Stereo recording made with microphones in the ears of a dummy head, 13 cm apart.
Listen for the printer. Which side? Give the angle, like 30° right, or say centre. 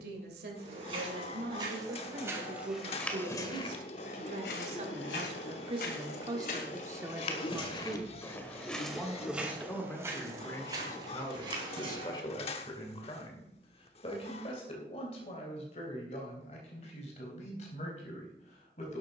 40° left.